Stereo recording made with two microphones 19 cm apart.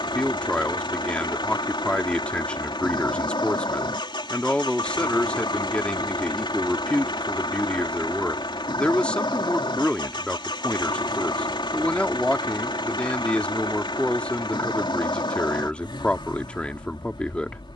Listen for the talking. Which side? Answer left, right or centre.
centre.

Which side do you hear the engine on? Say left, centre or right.
left.